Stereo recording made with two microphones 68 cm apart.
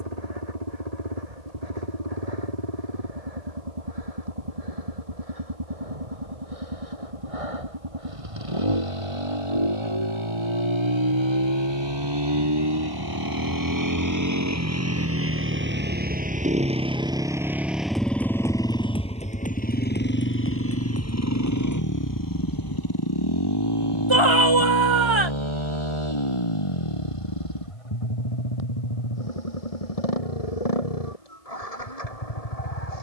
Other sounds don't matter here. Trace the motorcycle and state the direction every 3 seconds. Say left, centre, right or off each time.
right, right, right, right, right, centre, centre, left, left, left, left.